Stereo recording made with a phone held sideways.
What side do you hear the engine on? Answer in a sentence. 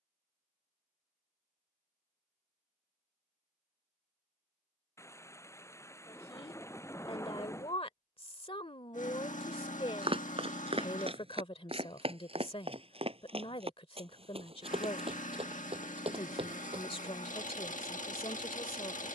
In this clip you hear the engine on the left.